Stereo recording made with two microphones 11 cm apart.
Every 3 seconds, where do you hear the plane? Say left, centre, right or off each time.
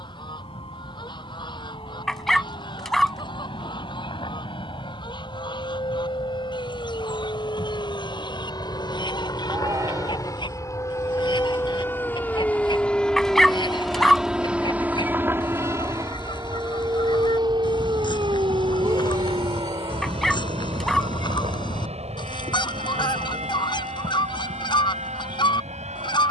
left, left, left, left, centre, right, right, right, right.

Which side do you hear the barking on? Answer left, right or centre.
centre.